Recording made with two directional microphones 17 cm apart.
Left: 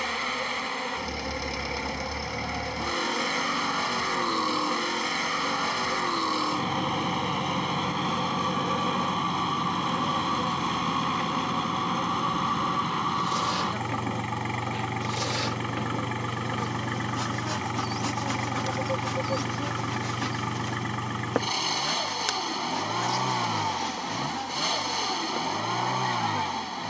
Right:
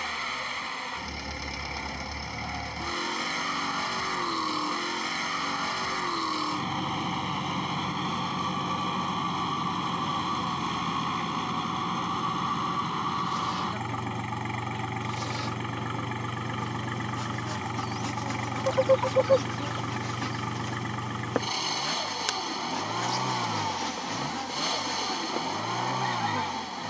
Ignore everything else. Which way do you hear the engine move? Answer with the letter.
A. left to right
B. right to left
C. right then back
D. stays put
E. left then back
D.